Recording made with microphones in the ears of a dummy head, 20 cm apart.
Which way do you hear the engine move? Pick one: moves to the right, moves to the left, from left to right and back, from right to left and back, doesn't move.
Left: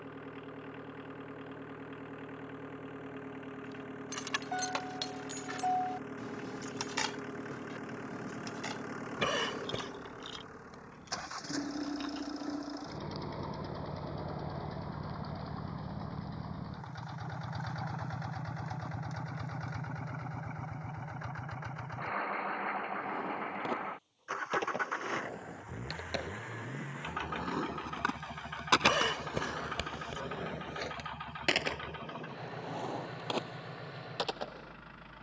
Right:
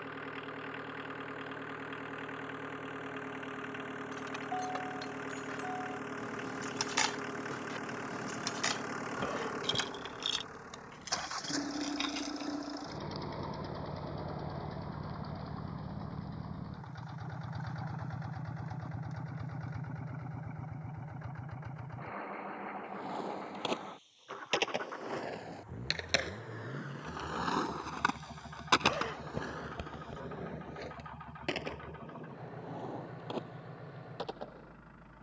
moves to the left.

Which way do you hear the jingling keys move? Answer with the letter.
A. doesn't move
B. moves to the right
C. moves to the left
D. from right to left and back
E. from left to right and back
B.